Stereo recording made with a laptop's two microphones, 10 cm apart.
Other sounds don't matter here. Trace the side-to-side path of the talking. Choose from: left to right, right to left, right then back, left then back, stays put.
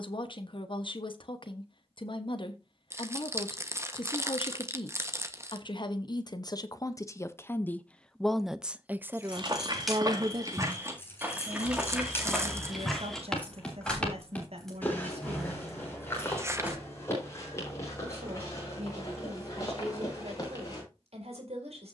left to right.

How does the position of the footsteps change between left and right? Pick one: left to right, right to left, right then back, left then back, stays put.
right to left.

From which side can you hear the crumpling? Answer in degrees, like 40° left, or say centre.
30° right.